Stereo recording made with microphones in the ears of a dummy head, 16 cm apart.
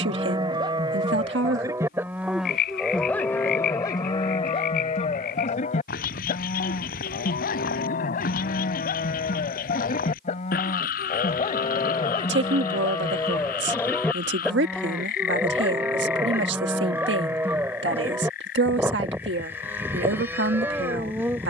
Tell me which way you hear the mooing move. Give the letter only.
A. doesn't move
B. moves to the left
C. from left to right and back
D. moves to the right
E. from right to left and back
E.